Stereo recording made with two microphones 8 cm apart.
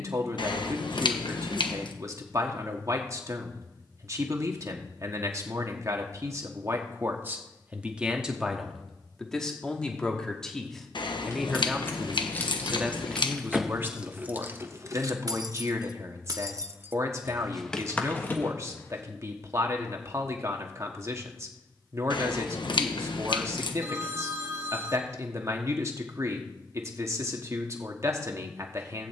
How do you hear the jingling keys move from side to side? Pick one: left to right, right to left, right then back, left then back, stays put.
right then back.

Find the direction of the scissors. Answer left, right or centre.
left.